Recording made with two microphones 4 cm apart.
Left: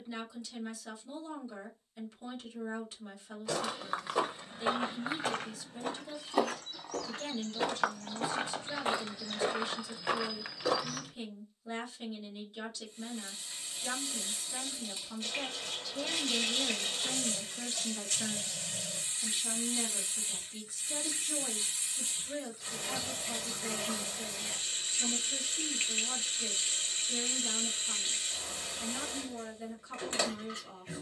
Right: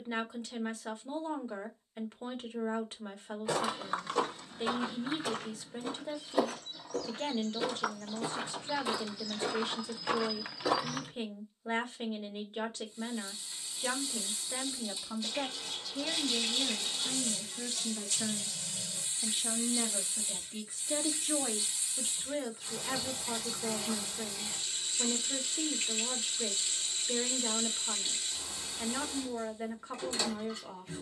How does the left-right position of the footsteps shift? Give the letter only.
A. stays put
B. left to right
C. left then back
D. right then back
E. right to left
C.